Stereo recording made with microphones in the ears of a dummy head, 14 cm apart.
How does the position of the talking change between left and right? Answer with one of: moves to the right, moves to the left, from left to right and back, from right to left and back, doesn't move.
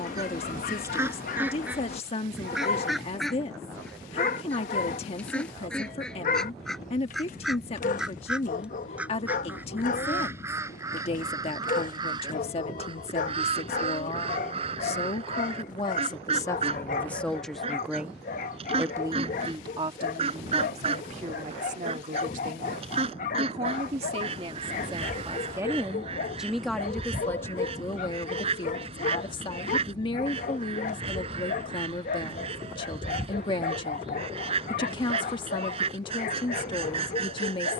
from left to right and back.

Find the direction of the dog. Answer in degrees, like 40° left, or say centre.
50° left.